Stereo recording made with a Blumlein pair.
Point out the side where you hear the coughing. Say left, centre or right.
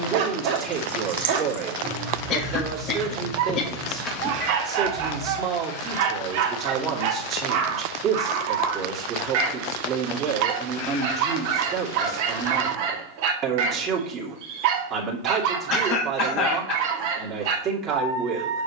left.